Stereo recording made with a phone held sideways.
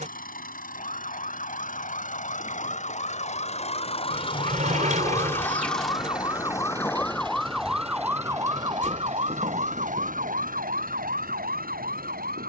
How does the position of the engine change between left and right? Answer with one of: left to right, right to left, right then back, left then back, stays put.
left to right.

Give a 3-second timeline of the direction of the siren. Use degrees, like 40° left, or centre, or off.
60° left, 40° left, centre, 60° right.